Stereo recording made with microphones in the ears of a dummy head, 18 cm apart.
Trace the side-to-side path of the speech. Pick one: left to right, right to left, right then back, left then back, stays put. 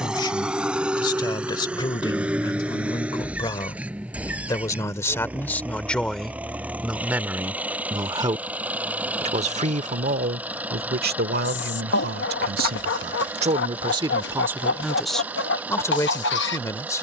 right then back.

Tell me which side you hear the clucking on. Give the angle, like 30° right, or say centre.
60° left.